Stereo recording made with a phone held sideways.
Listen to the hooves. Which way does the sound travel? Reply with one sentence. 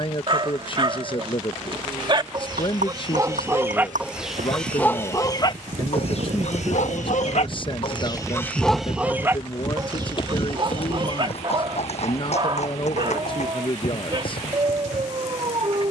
You can hear the hooves move to the left.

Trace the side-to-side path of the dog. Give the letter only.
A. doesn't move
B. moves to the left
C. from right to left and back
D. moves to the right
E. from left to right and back
C.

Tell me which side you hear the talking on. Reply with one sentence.
You can hear the talking on the left.